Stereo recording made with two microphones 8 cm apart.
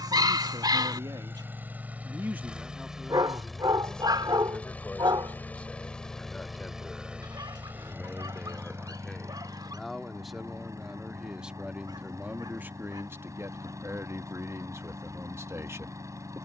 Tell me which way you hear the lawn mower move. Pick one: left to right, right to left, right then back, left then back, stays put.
left then back.